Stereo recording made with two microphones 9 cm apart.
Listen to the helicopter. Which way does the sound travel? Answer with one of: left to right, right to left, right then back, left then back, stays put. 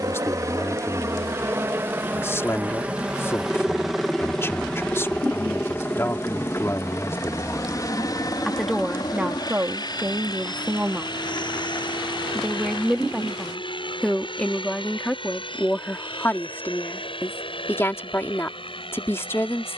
right to left.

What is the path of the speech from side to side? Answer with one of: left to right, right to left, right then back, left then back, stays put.
right then back.